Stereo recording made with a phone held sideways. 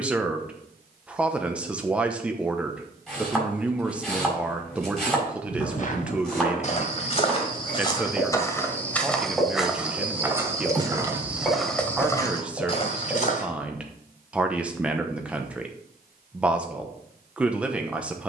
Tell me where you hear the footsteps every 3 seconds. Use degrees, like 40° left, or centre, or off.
off, 50° left, 30° left, 10° right, 40° left, off.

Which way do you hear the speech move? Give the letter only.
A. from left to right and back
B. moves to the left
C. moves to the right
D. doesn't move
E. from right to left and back
D.